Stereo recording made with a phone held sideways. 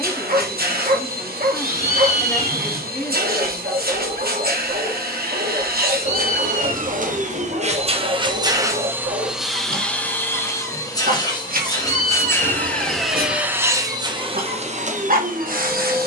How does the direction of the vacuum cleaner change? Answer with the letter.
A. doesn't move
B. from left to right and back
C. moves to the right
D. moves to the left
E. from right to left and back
E.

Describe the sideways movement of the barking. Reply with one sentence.
In this clip you hear the barking stay put.